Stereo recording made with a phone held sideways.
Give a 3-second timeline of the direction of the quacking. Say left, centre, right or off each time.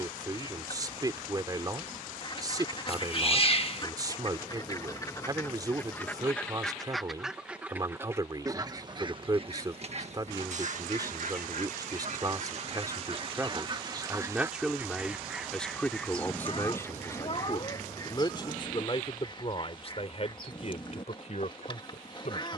left, left, centre, right, right, centre, left, left.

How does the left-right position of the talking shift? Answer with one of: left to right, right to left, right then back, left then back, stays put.
right to left.